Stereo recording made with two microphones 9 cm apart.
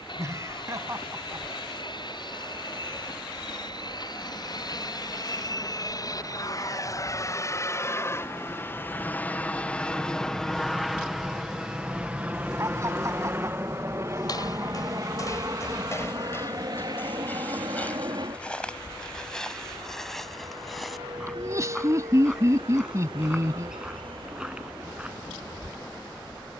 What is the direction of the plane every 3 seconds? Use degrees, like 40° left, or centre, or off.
70° left, 50° left, 30° left, centre, 30° right, 40° right, 50° right, 60° right, 60° right.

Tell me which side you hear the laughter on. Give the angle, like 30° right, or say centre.
40° right.